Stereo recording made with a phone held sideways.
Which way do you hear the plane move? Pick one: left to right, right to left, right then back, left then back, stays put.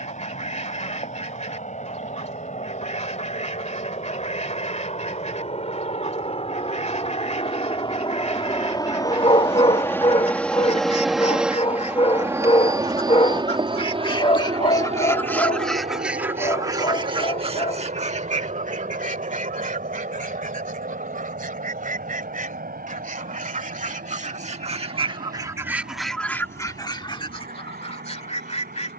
left to right.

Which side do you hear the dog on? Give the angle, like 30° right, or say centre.
40° left.